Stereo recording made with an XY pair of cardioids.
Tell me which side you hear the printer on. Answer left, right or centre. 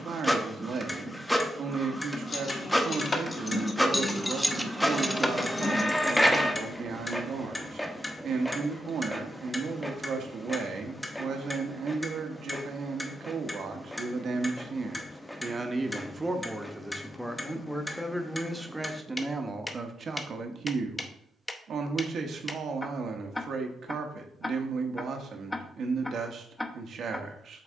centre.